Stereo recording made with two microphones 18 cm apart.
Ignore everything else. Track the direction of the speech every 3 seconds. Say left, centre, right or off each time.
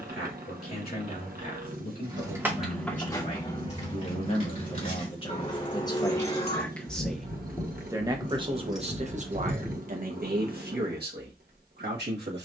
left, left, centre, right.